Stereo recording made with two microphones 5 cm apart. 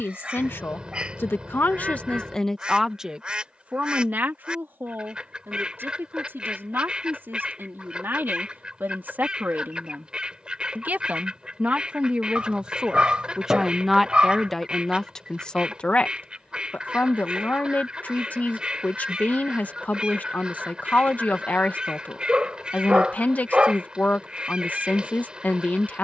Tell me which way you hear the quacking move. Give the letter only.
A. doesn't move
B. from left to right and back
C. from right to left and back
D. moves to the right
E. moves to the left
A.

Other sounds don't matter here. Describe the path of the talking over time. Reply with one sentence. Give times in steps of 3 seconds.
In this clip you hear the talking on the left from 0 s, on the right from 3 s, in the centre from 12 s and on the left from 15 s.